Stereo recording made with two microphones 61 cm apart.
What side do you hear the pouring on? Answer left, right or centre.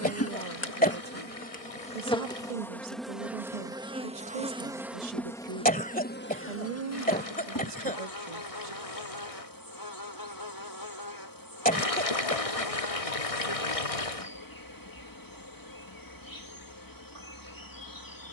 left.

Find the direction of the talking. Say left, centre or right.
right.